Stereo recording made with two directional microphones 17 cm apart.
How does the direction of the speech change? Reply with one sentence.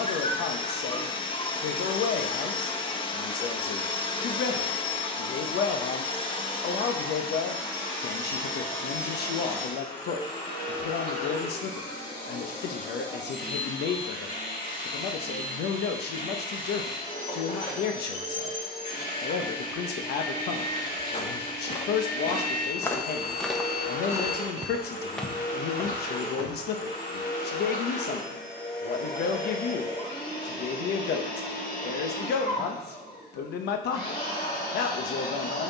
In this clip you hear the speech stay put.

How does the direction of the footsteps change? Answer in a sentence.
In this clip you hear the footsteps move from left to right and back again.